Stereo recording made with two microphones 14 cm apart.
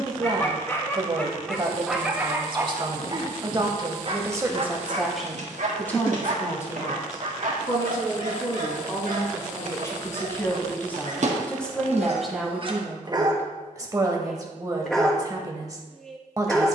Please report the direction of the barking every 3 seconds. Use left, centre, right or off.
centre, right, right, right, right, centre.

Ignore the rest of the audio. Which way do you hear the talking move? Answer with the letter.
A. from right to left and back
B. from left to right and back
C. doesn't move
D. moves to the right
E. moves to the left
A.